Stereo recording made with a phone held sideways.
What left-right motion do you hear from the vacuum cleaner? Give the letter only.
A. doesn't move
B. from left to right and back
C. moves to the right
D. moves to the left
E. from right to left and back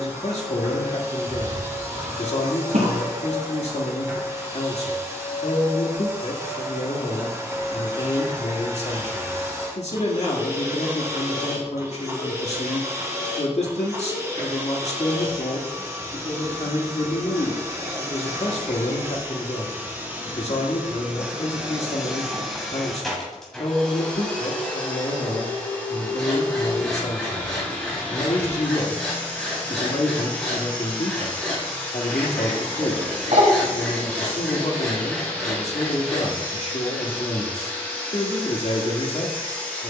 D.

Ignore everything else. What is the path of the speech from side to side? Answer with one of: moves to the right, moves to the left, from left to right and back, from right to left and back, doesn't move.
doesn't move.